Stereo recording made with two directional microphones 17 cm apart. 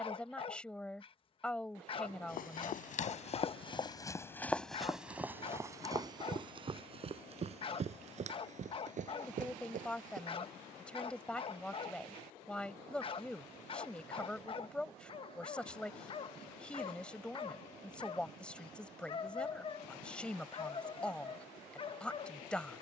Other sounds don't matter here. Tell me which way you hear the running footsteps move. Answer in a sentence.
You can hear the running footsteps move from left to right.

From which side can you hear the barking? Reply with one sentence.
In this clip you hear the barking on the left.